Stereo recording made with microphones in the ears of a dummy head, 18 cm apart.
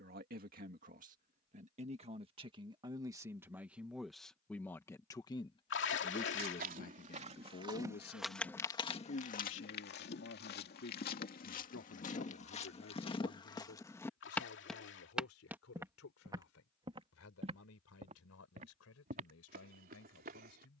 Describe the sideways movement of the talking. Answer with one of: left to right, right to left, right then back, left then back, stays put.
right to left.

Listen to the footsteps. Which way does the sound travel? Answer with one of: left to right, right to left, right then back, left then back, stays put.
left then back.